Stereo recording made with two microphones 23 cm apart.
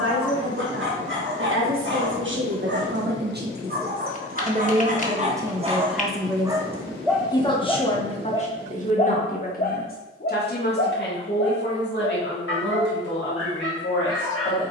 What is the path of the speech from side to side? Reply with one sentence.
You can hear the speech travel towards the left.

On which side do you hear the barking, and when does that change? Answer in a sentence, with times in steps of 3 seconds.
In this clip you hear the barking on the right from 0 s, in the centre from 6 s and on the left from 9 s.